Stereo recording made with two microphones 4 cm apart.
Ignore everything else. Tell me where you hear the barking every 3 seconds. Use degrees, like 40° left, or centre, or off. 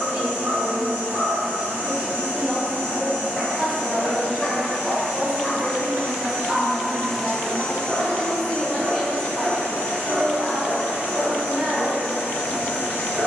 50° right, 10° left, 30° right, 50° right, 50° right.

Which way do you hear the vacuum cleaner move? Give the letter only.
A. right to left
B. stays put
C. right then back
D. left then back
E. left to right
A.